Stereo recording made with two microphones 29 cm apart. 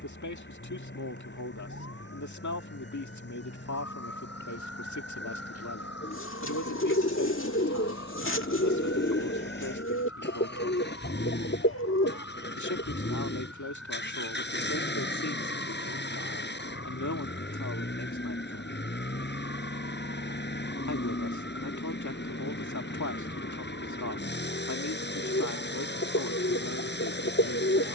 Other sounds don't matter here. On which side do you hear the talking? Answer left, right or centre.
left.